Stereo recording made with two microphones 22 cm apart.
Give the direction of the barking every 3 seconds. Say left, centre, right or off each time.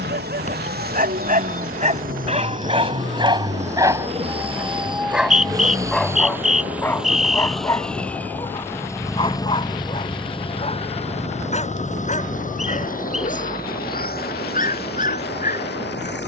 right, centre, centre, left, left, left.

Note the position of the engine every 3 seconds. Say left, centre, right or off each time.
right, right, centre, left, left, left.